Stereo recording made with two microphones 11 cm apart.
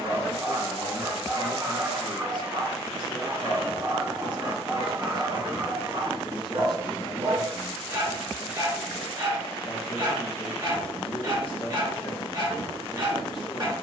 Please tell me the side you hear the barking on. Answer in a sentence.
You can hear the barking on the right.